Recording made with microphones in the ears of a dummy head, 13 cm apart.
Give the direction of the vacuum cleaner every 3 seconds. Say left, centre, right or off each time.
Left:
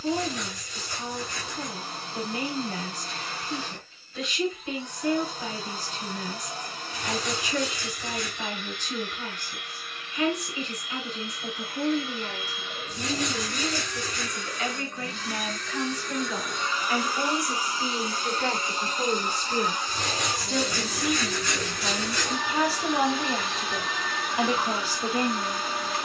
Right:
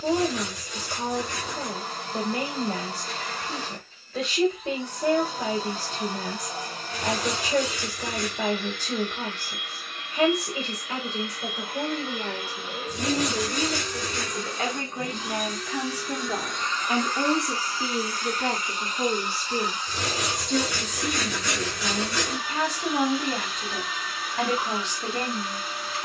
right, right, right, right, right, centre, left, left, left.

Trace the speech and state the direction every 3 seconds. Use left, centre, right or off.
right, right, right, right, right, right, centre, centre, centre.